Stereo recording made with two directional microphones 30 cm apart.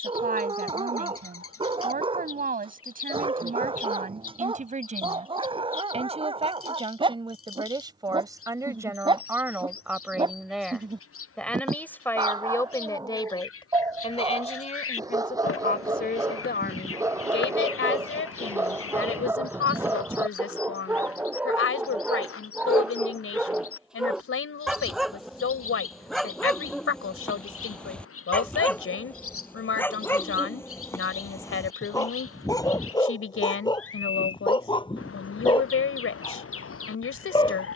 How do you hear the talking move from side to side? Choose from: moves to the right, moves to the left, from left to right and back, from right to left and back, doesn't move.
moves to the left.